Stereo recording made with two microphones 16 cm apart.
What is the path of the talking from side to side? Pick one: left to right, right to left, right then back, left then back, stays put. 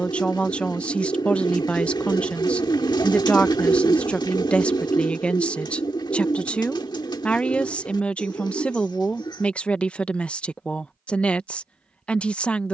stays put.